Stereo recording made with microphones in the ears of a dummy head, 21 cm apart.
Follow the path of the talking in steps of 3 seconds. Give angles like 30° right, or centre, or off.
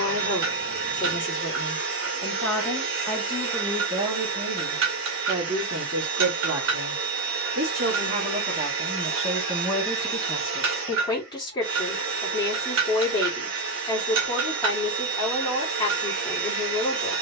20° left, 20° right, 40° right, 10° left, 20° left, 20° left.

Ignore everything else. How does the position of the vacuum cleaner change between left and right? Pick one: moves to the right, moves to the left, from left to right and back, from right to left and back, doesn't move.
doesn't move.